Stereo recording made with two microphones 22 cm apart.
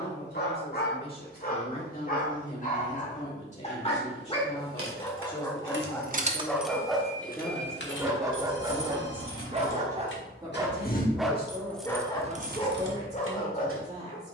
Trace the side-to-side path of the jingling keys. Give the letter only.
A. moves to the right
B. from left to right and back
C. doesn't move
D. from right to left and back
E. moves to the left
D.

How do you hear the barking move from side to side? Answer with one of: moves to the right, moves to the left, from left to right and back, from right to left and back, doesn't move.
from left to right and back.